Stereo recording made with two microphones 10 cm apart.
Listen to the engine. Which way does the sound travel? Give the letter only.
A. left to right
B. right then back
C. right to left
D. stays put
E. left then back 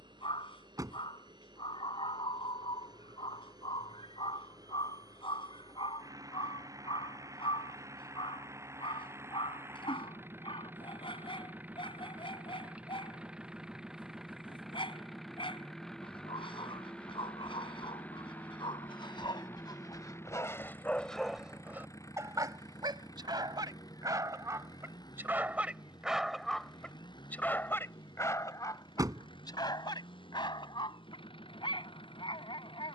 C.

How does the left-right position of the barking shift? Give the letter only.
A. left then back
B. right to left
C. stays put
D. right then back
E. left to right
D.